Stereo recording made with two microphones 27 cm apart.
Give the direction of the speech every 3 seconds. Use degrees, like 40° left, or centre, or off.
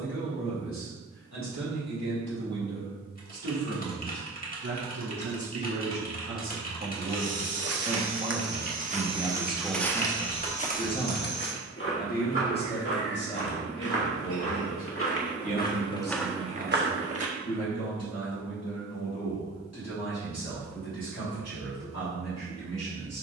70° right, 60° right, 30° right, 10° left, 40° left, 60° left, 60° left, 70° left.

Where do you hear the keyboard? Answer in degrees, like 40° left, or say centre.
30° left.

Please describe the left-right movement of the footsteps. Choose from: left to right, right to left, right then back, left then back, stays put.
left then back.